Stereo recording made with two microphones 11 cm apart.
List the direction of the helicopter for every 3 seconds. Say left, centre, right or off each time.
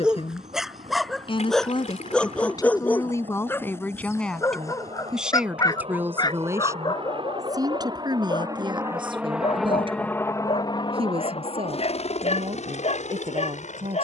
right, right, right, left, left.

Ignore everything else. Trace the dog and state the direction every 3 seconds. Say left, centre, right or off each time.
centre, left, left, left, left.